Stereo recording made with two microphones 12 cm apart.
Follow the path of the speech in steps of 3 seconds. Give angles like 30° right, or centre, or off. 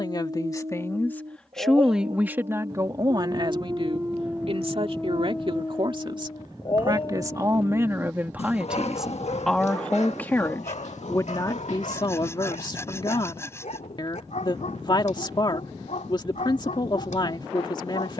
centre, 50° right, 20° right, 20° left, 40° left, 40° left.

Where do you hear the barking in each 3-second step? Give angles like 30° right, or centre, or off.
50° right, 10° right, 50° left, 70° left, 80° left, 80° left.